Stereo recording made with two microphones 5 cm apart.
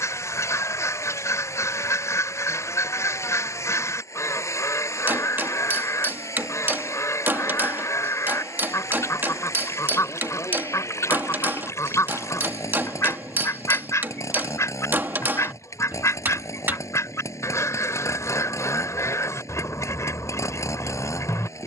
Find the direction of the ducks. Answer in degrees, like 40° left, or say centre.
60° left.